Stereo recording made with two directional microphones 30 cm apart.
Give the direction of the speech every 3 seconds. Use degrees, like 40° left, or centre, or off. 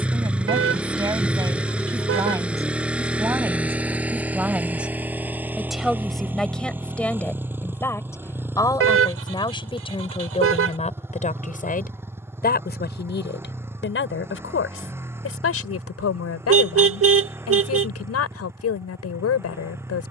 10° right, centre, 10° left, 20° left, 40° left, 50° left, 60° left.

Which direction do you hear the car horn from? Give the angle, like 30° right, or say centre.
50° right.